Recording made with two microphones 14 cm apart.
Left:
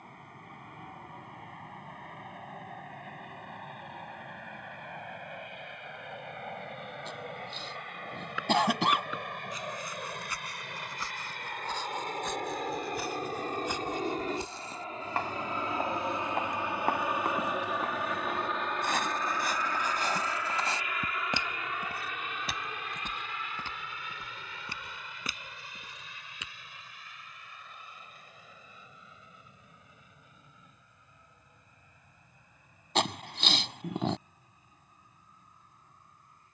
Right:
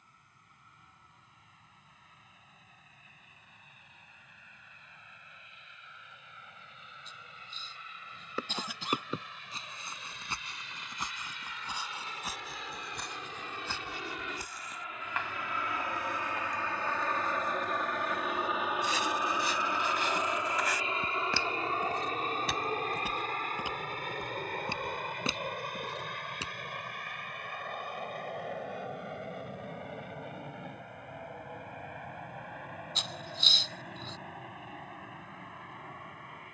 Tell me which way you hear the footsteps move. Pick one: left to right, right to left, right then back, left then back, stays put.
left then back.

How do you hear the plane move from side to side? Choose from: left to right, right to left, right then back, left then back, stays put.
left to right.